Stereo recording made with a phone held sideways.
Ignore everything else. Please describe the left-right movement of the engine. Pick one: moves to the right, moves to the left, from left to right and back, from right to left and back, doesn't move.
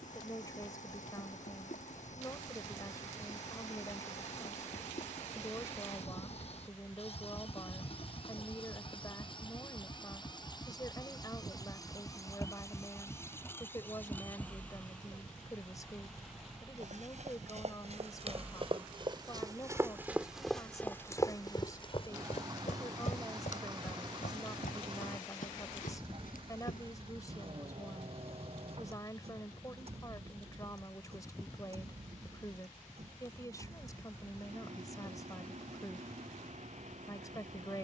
moves to the right.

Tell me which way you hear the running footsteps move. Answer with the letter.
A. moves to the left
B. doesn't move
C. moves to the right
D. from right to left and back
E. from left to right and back
A.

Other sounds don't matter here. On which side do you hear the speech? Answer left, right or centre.
left.